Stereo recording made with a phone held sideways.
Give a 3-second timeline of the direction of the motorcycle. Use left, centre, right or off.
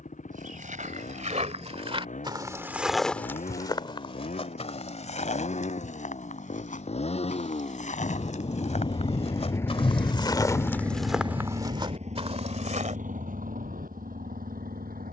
left, left, left, centre, right.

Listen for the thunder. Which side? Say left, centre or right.
left.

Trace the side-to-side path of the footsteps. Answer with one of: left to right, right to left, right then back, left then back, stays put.
left then back.